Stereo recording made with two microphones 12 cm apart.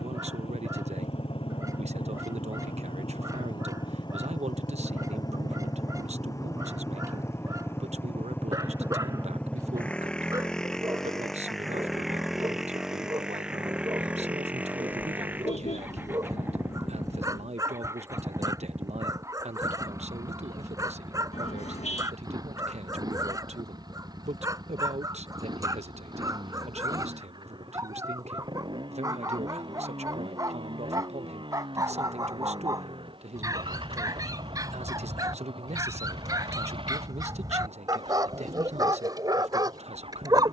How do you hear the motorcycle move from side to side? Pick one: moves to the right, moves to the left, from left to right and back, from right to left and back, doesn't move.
moves to the right.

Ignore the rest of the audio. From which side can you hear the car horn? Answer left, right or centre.
left.